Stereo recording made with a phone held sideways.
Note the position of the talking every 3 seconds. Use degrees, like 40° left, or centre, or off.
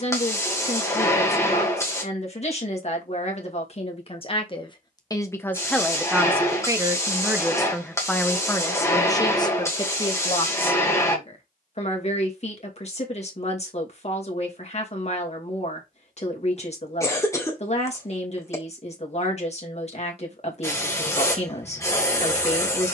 50° left, 30° left, centre, 40° left, 50° left, 50° left, 50° left, 50° left.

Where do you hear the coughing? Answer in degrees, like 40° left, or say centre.
20° left.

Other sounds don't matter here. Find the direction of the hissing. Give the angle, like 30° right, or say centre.
20° left.